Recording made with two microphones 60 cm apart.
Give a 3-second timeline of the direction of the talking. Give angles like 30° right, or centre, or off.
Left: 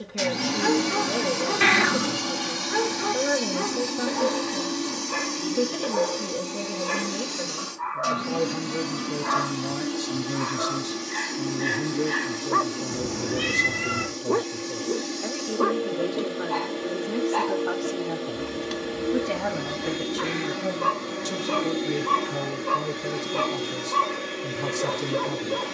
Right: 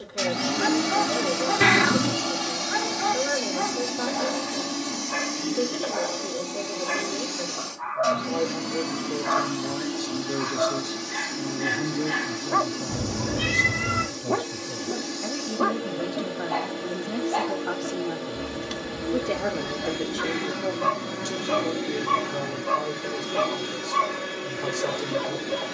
50° left, 50° left, 50° left, 20° left, 20° right, 10° right, 30° left, 40° left, 40° left.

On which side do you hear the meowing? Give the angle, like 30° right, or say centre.
60° right.